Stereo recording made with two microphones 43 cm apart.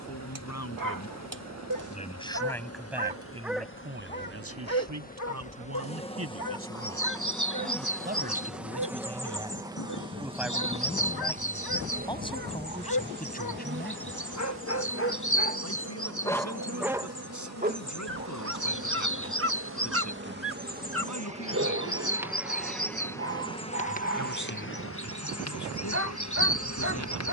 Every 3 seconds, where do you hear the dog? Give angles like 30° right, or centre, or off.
50° right, 20° left, 60° left, 60° left, 40° left, centre, 30° right, 30° right, 30° right.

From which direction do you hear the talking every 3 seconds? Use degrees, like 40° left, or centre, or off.
20° left, 30° right, 30° right, centre, 20° left, 40° left, 40° left, 40° left, 40° left.